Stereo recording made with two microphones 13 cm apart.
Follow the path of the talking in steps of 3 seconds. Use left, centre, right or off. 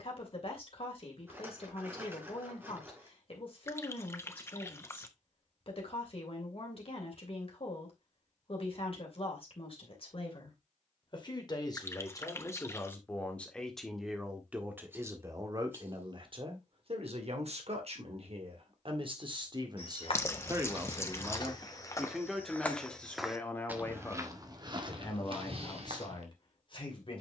left, left, left, left, centre, right, right, centre, left.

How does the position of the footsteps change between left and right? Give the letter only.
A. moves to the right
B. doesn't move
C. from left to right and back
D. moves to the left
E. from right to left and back
A.